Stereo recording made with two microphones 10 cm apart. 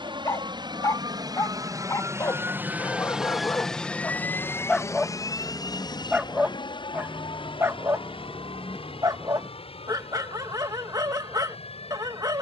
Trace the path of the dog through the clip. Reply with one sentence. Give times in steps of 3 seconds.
In this clip you hear the dog on the left from 0 s, in the centre from 3 s and on the right from 6 s.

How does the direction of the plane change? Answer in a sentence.
You can hear the plane travel towards the left.